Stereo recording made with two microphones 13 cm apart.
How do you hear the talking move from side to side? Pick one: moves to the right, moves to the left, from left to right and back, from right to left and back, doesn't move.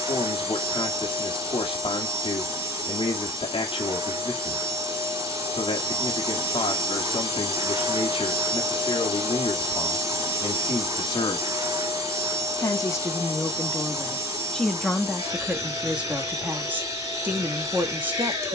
moves to the right.